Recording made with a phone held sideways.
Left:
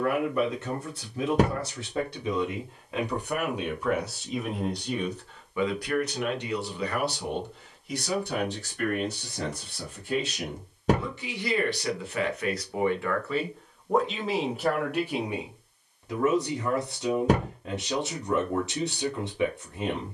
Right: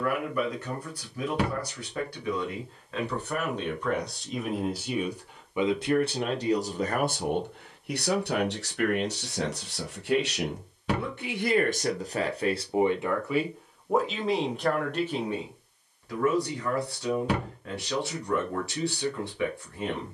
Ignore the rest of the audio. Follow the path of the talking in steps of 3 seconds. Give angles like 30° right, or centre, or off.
20° left, centre, 50° right, 60° right, 10° right, 20° left, 20° left.